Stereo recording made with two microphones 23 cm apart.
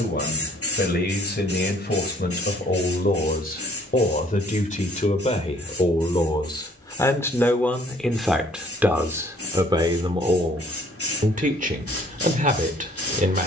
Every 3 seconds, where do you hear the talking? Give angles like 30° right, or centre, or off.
40° left, 30° left, 10° left, 20° right, 30° right.